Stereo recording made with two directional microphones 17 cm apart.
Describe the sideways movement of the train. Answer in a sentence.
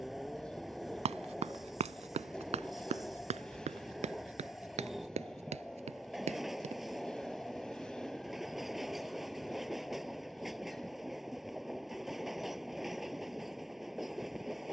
In this clip you hear the train stay put.